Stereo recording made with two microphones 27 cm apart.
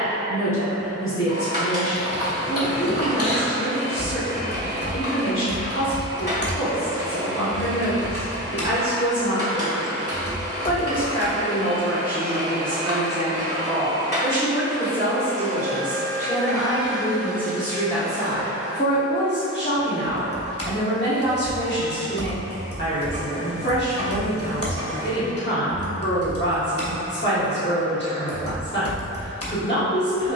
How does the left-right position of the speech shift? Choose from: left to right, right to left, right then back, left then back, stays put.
right then back.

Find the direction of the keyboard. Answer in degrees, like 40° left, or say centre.
60° left.